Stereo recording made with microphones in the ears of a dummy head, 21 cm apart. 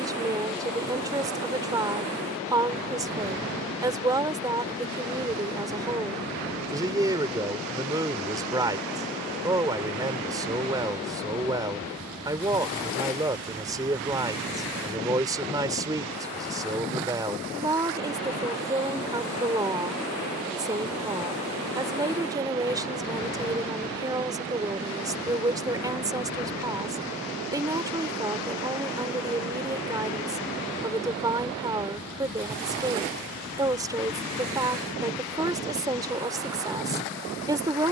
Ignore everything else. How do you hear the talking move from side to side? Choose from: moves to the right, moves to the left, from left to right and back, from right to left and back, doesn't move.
doesn't move.